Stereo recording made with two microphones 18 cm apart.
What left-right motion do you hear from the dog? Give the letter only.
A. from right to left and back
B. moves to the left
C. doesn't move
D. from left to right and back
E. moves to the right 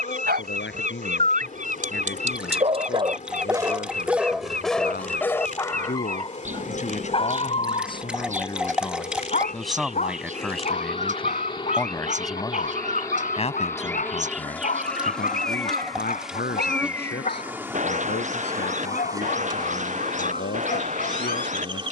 B.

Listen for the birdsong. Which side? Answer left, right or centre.
right.